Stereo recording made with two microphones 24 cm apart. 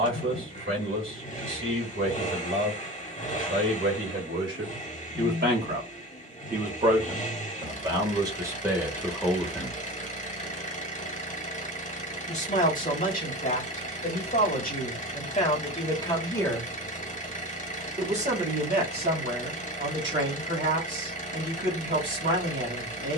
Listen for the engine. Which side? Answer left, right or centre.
left.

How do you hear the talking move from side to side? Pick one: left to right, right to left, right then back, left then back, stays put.
left then back.